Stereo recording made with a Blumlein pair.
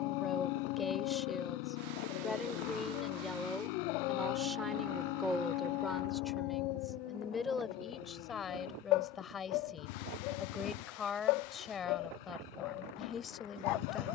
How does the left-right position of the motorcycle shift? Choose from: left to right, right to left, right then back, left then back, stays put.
stays put.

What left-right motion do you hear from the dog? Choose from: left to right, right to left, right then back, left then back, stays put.
stays put.